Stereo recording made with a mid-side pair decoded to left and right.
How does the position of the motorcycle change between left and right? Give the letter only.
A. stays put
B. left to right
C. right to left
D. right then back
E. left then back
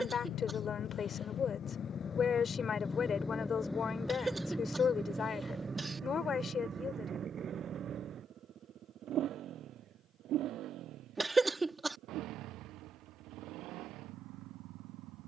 B.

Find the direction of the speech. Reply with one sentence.
You can hear the speech on the left.